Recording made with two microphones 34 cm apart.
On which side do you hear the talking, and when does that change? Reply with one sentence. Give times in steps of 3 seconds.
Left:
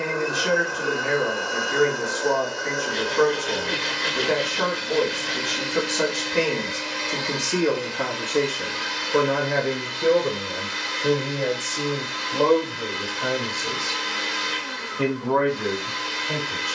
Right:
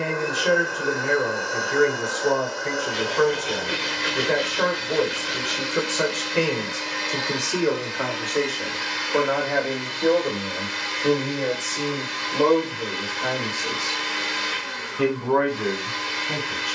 You can hear the talking on the left from 0 s, in the centre from 9 s and on the right from 12 s.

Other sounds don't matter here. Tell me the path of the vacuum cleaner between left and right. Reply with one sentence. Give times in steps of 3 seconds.
In this clip you hear the vacuum cleaner on the left from 0 s, in the centre from 3 s and on the right from 6 s.